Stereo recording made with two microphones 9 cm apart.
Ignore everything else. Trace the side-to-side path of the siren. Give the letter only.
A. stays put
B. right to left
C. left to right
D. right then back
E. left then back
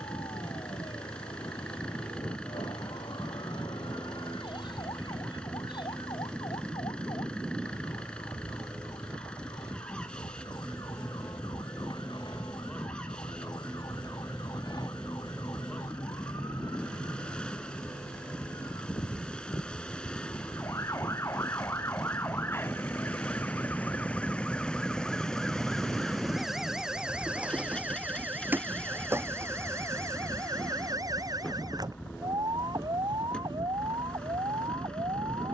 C.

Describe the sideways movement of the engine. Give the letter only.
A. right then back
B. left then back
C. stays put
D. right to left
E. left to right
C.